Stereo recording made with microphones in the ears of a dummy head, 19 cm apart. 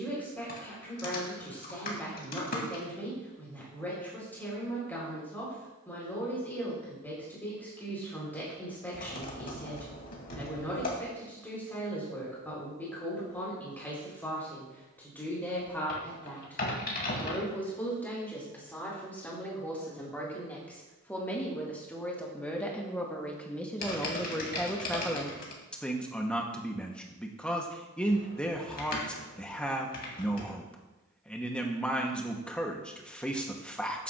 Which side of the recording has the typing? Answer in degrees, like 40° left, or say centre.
40° left.